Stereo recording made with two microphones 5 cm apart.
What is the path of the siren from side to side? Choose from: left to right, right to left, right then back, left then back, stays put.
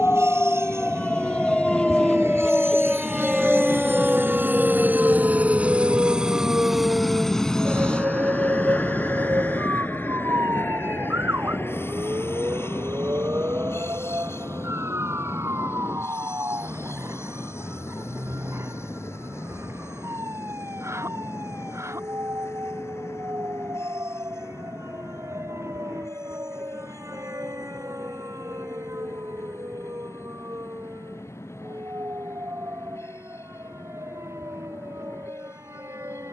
left to right.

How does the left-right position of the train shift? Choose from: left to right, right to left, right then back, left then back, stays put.
right to left.